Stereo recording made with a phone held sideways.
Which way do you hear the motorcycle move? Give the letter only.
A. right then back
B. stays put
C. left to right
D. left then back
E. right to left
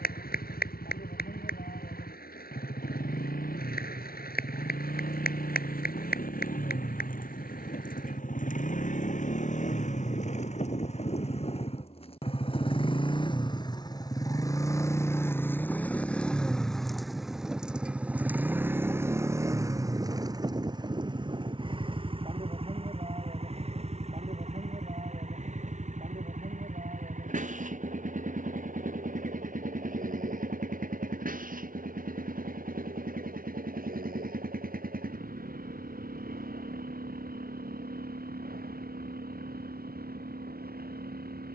C.